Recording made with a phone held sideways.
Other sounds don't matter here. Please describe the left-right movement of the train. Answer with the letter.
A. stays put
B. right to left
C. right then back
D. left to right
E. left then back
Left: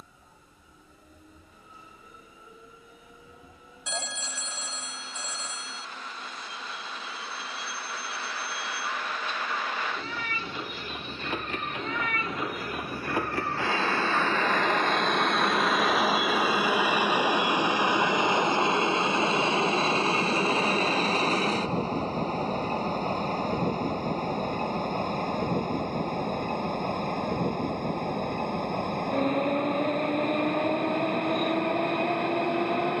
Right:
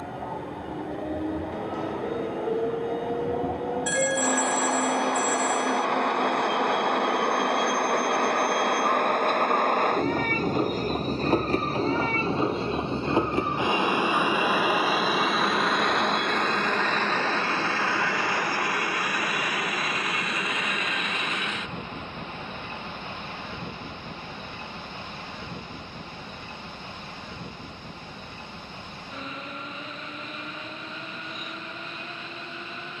B.